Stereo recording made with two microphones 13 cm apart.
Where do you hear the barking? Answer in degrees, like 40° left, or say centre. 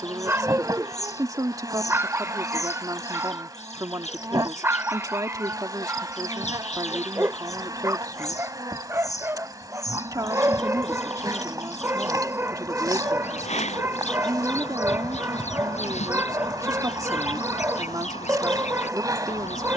20° right.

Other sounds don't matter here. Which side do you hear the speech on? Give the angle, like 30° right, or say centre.
30° right.